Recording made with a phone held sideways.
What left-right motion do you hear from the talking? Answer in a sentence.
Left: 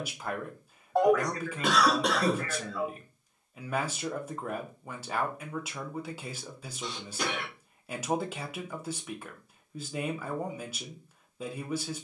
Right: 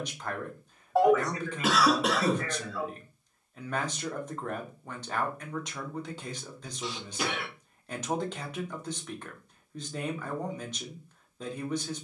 In this clip you hear the talking stay put.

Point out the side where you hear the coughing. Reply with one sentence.
You can hear the coughing in the centre.